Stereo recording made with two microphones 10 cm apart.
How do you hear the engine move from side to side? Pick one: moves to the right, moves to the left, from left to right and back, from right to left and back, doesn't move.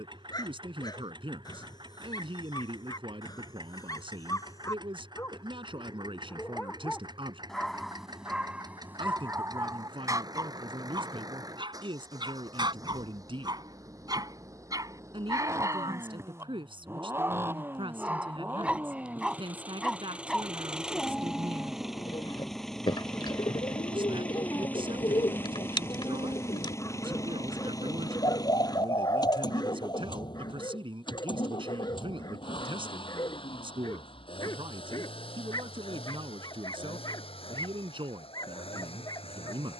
moves to the left.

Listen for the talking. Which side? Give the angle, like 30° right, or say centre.
60° right.